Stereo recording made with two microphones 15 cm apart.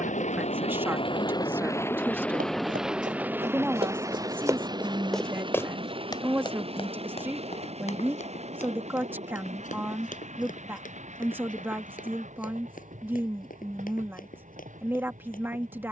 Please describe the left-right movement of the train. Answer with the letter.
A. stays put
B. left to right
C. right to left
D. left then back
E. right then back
B.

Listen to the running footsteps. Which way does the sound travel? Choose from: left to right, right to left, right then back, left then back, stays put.
right to left.